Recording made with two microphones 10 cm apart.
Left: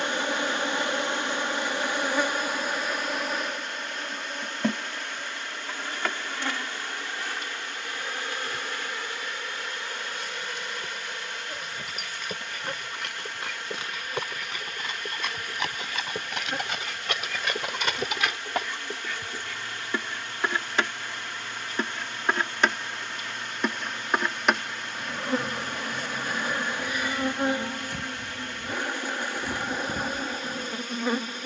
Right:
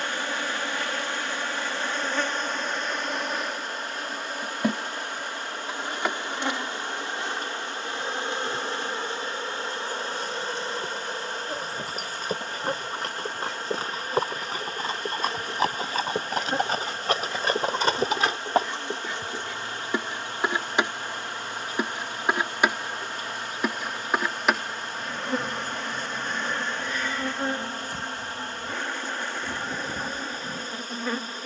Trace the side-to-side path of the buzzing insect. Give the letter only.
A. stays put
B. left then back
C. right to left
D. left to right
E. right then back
E.